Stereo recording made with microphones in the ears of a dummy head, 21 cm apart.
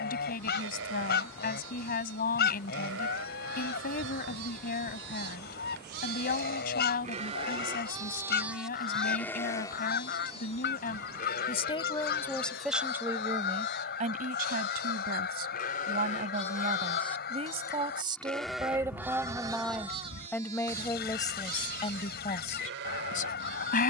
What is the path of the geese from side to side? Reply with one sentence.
In this clip you hear the geese stay put.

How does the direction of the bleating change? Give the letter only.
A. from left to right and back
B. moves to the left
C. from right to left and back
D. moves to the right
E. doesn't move
C.